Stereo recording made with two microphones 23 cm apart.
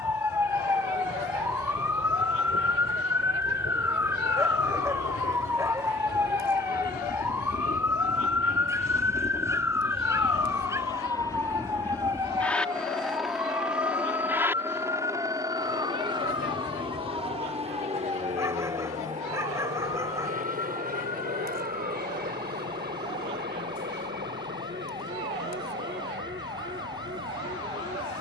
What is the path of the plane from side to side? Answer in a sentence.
You can hear the plane travel towards the right.